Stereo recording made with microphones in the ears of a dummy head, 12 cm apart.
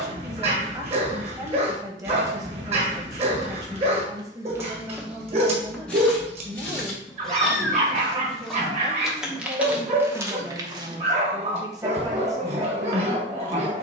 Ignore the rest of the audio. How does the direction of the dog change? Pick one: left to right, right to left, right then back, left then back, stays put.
stays put.